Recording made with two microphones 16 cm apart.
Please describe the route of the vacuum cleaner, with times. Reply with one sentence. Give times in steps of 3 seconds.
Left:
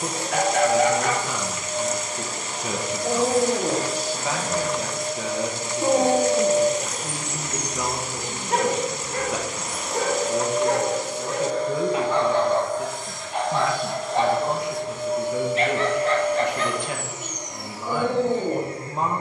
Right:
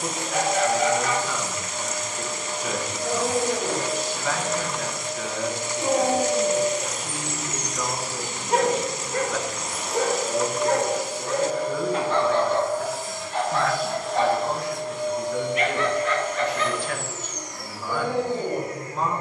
You can hear the vacuum cleaner on the left from 0 s, in the centre from 9 s and on the left from 18 s.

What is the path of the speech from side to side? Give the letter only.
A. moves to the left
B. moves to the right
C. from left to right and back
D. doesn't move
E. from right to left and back
D.